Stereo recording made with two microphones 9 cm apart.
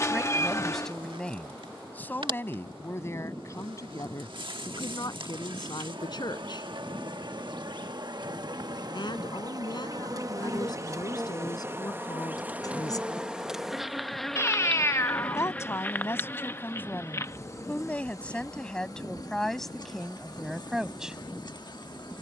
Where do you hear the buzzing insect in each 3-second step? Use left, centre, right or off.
right, right, right, right, centre, left, left, left.